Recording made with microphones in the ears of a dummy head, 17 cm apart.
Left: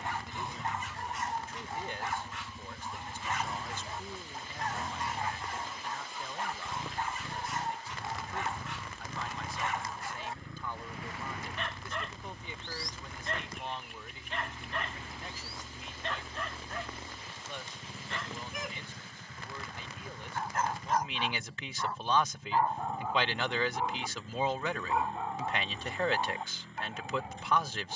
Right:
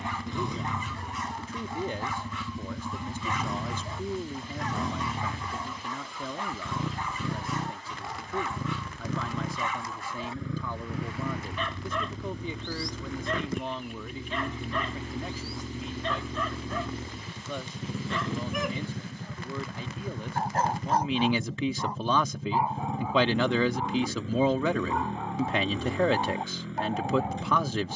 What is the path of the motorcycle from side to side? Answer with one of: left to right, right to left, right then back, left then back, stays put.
stays put.